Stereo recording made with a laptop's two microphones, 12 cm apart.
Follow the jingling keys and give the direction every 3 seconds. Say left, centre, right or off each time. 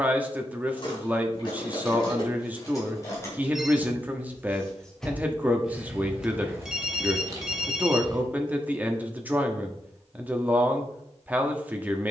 left, centre, right, off.